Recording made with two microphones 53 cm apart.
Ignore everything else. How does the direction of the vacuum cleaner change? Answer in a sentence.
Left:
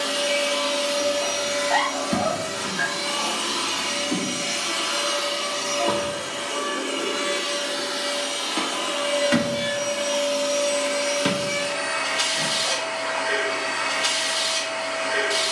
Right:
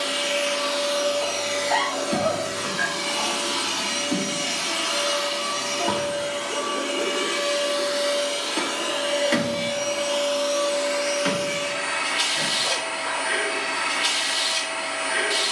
You can hear the vacuum cleaner go right and come back.